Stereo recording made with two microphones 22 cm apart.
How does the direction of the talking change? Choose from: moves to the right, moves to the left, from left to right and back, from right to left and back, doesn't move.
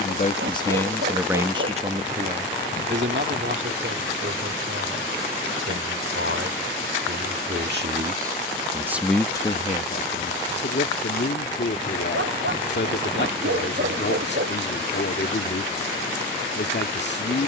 from left to right and back.